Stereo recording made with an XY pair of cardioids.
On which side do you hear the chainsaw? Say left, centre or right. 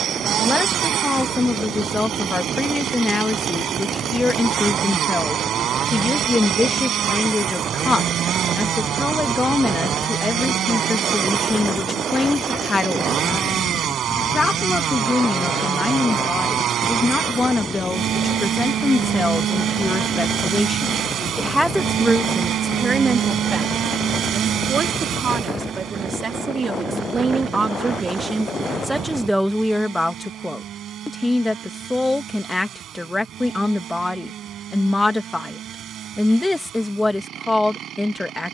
right.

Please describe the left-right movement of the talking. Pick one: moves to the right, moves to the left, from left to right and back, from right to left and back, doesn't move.
from left to right and back.